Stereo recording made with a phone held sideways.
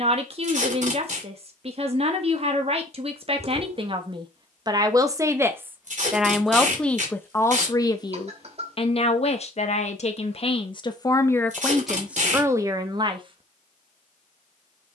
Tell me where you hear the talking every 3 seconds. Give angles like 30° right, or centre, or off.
50° right, 30° right, 20° left, 30° left, 20° right.